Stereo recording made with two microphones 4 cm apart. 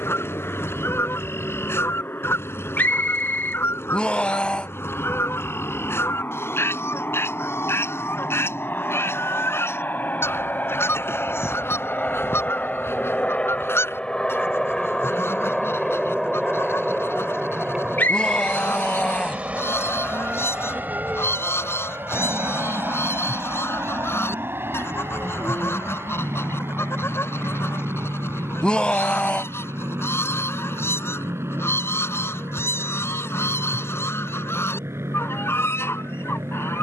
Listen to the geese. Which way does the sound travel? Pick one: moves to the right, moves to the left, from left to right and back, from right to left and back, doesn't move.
doesn't move.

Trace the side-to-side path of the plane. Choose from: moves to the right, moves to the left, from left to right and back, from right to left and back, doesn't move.
moves to the right.